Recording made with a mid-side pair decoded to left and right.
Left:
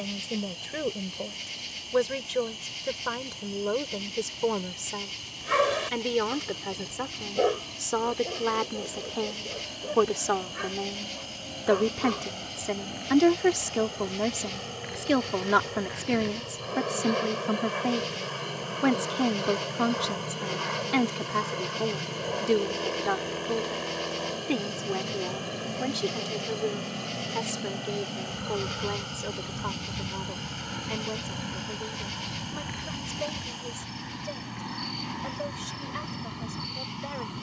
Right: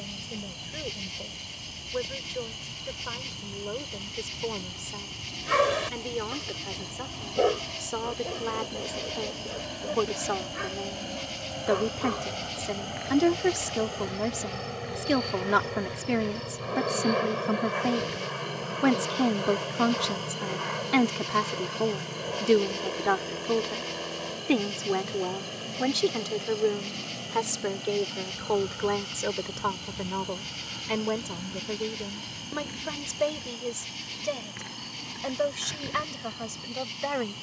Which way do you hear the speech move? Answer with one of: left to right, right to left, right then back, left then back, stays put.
left to right.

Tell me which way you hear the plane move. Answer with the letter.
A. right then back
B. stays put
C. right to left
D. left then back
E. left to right
C.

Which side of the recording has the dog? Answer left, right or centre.
centre.